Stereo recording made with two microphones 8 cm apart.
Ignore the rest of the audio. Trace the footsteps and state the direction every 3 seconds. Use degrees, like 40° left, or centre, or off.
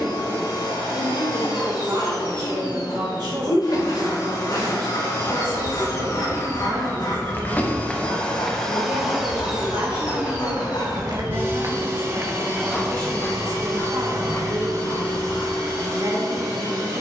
off, 50° left, 20° left, 50° right, 30° left, 50° left.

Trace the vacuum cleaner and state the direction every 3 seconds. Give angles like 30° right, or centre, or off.
70° left, 60° left, 20° left, 20° right, 50° right, 60° right.